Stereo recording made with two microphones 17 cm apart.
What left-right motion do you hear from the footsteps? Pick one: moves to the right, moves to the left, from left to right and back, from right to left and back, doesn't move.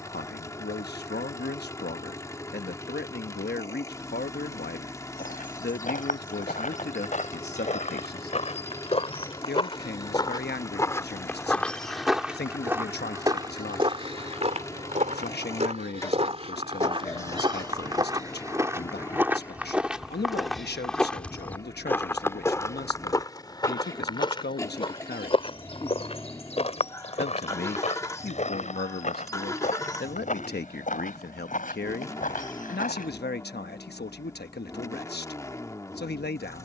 from left to right and back.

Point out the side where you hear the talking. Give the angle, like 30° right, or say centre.
80° left.